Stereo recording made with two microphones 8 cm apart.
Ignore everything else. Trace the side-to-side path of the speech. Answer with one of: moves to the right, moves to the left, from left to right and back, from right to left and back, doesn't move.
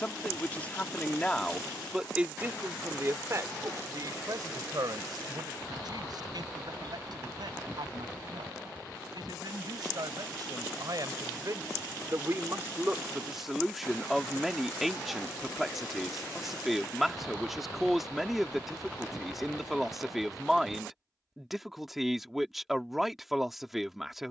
from left to right and back.